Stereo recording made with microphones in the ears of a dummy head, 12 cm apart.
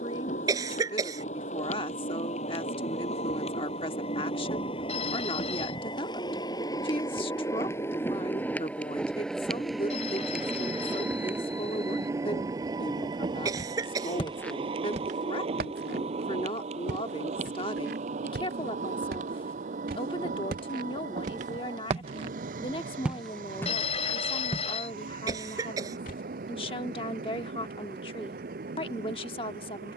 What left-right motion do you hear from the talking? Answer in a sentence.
You can hear the talking stay in one place.